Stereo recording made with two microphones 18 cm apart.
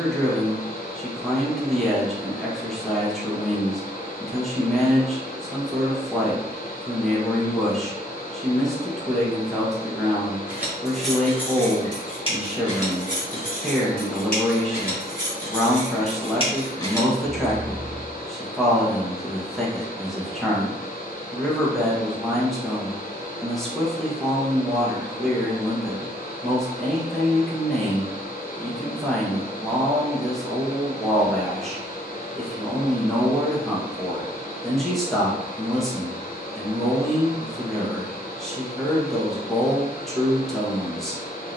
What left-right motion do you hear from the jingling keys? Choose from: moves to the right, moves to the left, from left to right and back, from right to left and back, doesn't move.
from right to left and back.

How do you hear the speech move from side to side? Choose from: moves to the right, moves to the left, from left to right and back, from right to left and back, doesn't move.
doesn't move.